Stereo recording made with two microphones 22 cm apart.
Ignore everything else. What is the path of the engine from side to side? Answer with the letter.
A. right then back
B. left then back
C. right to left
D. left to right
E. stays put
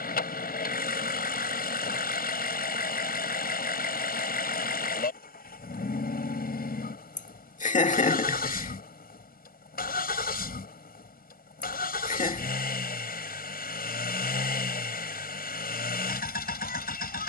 E.